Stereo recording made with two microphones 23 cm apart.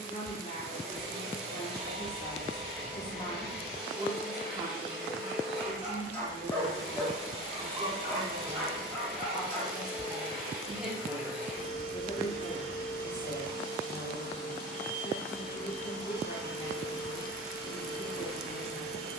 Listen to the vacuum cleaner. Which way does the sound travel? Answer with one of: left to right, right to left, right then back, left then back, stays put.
stays put.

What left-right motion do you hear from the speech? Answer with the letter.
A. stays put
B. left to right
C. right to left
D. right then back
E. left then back
D.